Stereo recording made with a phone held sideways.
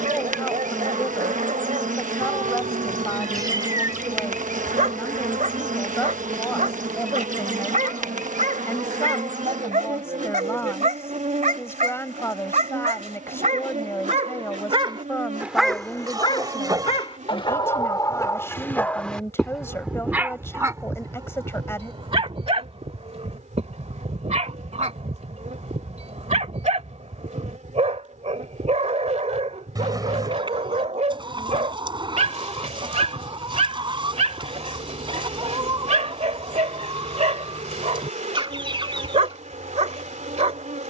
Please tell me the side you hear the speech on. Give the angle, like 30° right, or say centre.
20° left.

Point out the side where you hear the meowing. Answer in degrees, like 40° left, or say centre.
20° right.